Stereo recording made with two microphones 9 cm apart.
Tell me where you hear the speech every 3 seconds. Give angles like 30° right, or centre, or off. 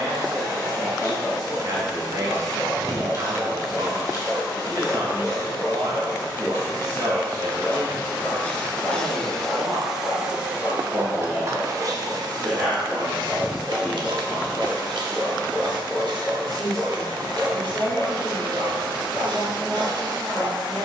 50° right, 50° right, 50° right, 30° right, centre, 10° left, 10° left.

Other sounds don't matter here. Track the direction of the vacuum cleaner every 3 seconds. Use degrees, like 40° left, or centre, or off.
40° left, 40° left, 30° left, 20° right, 60° right, 60° right, 60° right.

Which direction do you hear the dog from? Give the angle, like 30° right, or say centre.
30° right.